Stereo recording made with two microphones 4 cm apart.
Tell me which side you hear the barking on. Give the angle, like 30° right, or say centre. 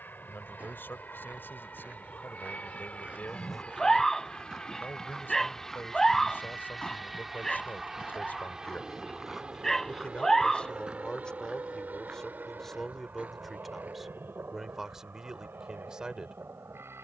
10° left.